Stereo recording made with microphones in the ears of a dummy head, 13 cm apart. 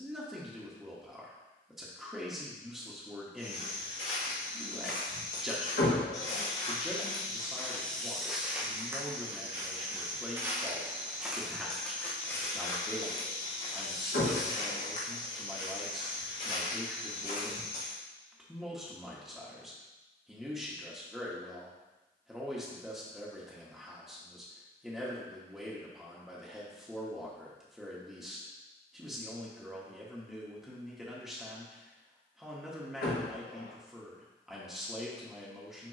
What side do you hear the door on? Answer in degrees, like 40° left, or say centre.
70° left.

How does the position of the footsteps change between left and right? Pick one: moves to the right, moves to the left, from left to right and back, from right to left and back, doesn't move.
from left to right and back.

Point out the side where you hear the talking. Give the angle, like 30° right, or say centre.
centre.